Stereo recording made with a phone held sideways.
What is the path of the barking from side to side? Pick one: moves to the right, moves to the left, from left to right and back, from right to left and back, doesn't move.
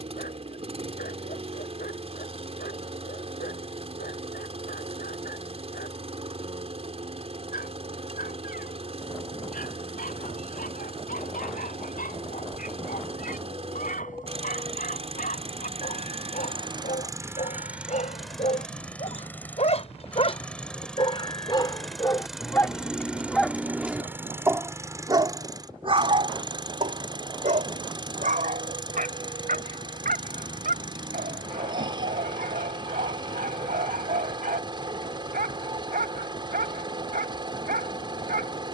moves to the right.